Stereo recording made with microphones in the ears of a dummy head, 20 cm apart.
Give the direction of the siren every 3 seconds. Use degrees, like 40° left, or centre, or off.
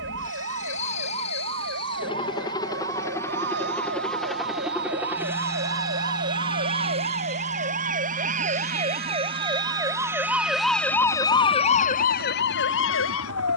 50° right, 50° right, 40° right, centre, 60° left.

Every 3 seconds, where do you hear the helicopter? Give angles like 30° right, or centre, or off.
30° left, centre, 30° right, 50° right, 60° right.